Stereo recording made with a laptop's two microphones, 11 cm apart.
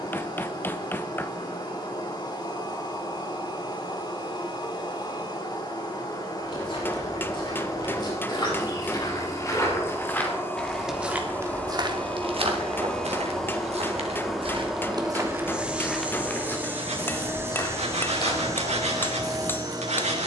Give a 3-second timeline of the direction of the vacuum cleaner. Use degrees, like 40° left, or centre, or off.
40° left, 40° left, 30° left, 20° left, centre, 20° right, 30° right.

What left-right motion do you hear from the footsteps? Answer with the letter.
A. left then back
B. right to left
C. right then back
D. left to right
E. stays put
C.